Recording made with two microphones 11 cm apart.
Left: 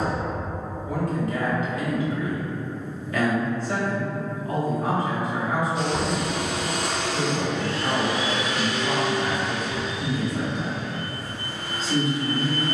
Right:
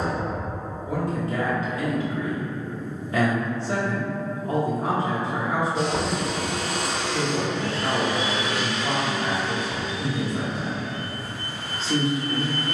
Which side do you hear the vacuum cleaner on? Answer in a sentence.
You can hear the vacuum cleaner on the right.